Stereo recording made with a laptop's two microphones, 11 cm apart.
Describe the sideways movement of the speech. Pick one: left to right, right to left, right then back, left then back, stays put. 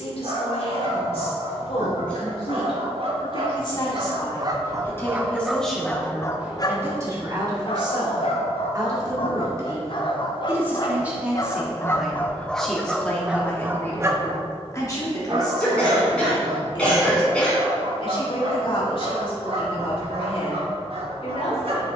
right then back.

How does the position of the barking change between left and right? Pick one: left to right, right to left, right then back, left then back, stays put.
left then back.